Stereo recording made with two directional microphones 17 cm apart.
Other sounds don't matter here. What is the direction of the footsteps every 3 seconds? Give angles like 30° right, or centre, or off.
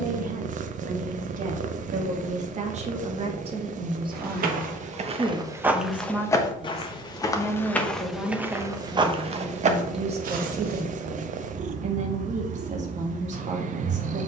off, 30° right, 10° left, 50° right, off.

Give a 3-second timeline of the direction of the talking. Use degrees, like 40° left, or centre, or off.
50° right, 20° right, centre, 40° right, 40° right.